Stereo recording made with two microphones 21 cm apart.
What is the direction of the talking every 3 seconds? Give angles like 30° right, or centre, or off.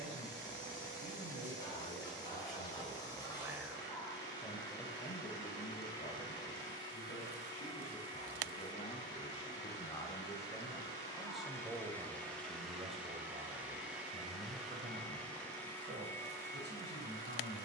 50° right, 10° left, 40° left, 10° left, 30° right, 50° right.